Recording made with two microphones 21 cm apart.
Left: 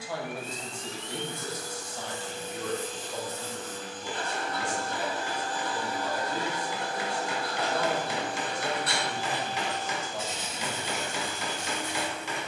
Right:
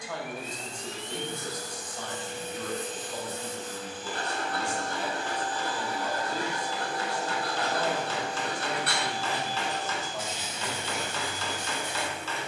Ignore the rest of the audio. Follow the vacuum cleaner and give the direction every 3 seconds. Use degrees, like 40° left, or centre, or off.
20° right, centre, 30° left, 10° left.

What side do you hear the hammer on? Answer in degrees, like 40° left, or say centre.
10° left.